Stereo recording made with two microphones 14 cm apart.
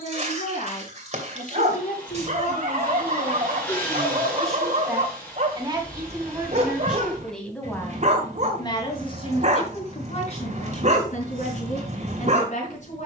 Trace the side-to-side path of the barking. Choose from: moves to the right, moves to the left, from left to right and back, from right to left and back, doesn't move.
doesn't move.